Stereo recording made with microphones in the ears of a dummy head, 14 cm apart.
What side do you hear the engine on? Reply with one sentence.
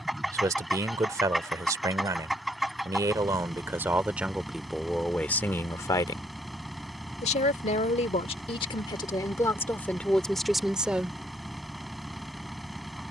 You can hear the engine in the centre.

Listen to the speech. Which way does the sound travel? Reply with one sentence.
You can hear the speech go left and come back.